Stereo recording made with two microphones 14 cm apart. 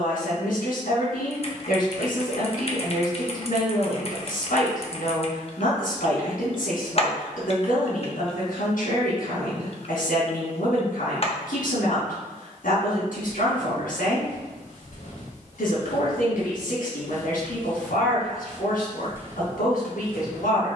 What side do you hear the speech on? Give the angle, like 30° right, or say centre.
70° left.